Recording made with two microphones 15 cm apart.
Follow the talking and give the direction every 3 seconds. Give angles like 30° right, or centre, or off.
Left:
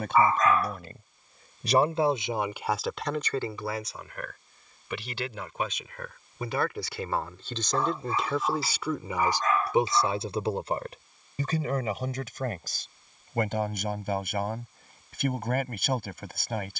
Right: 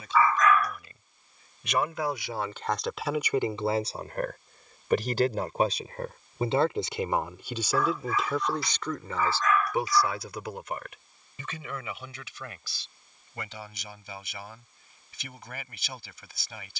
30° left, 30° right, 10° right, 30° left, 50° left, 50° left.